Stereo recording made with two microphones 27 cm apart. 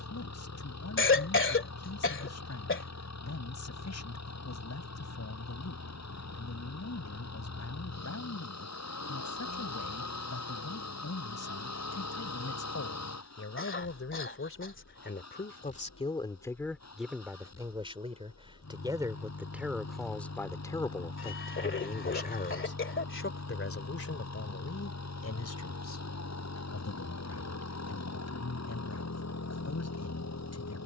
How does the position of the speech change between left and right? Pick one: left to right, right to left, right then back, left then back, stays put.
right then back.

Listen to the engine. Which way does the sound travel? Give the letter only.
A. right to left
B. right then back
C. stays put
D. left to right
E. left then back
C.